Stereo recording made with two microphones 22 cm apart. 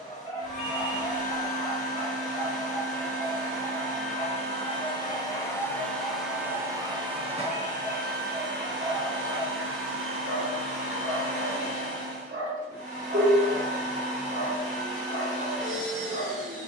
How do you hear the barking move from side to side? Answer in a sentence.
You can hear the barking travel towards the right.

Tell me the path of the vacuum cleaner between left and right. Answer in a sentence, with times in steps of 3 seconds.
You can hear the vacuum cleaner on the left from 0 s and on the right from 6 s.